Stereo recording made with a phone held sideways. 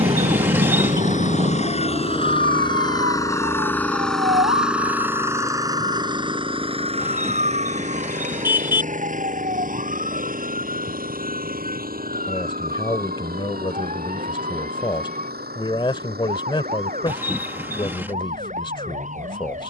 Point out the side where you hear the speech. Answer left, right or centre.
left.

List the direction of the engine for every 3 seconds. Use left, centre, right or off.
left, centre, right, right, right, right, right.